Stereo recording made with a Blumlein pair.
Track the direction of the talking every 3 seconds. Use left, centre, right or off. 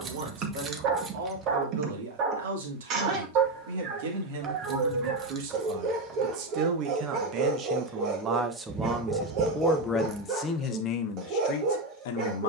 right, right, right, left.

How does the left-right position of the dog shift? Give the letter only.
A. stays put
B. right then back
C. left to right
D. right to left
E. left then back
A.